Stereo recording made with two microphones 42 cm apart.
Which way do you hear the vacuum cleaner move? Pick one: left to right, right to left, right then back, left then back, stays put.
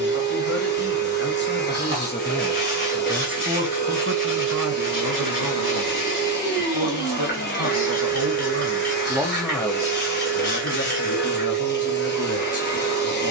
stays put.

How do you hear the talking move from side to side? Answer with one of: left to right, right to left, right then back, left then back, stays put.
right then back.